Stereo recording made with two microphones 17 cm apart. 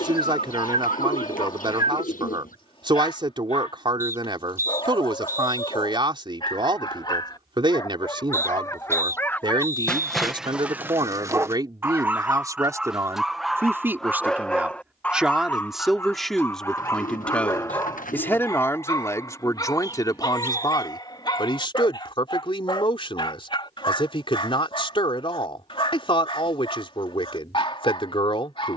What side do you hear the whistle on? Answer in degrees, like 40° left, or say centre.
20° right.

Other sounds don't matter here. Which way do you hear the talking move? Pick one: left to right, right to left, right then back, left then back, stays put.
right to left.